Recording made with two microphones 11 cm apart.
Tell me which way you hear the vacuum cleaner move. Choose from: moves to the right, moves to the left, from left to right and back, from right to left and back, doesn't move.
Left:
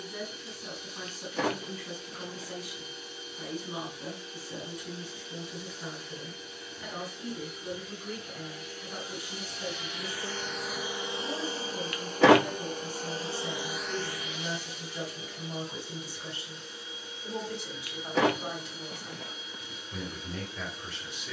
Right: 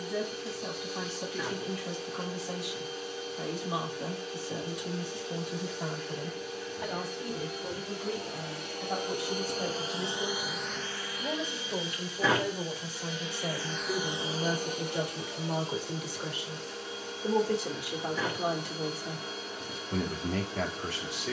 from right to left and back.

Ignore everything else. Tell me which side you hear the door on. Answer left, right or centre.
left.